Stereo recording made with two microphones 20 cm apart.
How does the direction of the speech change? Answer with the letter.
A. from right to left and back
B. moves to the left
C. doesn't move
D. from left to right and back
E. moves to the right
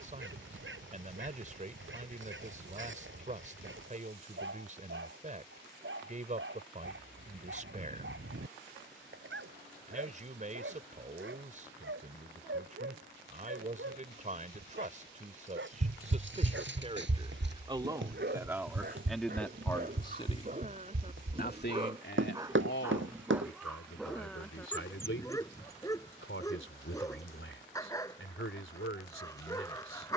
B.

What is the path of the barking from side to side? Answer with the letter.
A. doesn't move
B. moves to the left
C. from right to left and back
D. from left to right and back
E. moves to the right
B.